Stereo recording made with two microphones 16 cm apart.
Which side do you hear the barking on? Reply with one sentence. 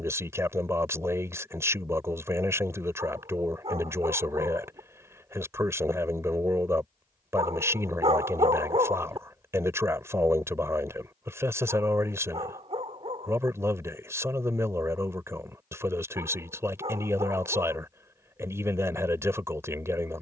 In this clip you hear the barking on the right.